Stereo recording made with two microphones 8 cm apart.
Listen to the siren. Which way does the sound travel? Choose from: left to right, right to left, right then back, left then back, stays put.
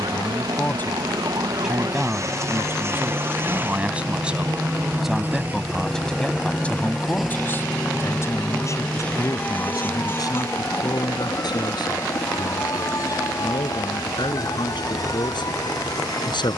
right to left.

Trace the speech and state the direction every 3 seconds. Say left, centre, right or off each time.
centre, centre, left, left, left, left.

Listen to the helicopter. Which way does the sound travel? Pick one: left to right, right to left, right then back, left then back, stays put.
right to left.